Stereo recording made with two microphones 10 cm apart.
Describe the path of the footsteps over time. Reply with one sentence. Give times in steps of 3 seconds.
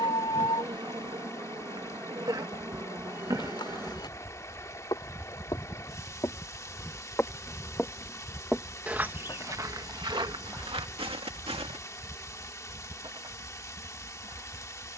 In this clip you hear the footsteps not at all from 0 s, on the left from 3 s, in the centre from 6 s, on the right from 9 s and not at all from 12 s.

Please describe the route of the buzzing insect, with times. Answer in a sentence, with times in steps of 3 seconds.
In this clip you hear the buzzing insect on the right from 0 s, in the centre from 6 s and on the right from 12 s.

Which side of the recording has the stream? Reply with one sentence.
In this clip you hear the stream on the left.